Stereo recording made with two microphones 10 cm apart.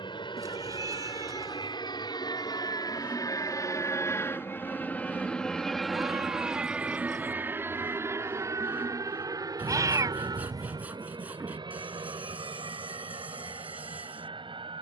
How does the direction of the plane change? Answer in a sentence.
In this clip you hear the plane move to the right.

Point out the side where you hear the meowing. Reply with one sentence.
In this clip you hear the meowing on the right.